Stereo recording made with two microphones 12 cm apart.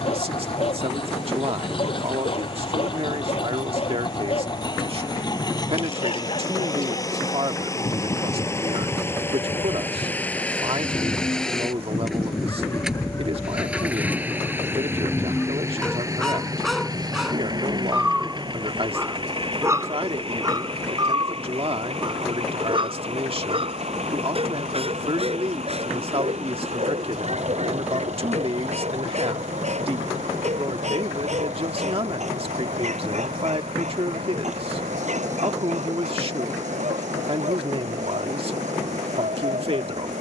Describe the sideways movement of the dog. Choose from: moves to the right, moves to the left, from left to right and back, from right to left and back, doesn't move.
moves to the right.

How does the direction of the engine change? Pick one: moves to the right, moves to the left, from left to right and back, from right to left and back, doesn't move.
moves to the right.